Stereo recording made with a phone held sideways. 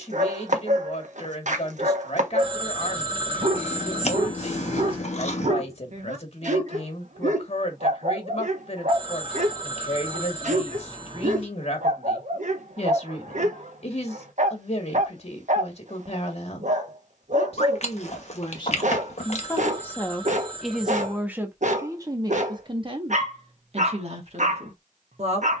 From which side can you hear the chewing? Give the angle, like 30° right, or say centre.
50° left.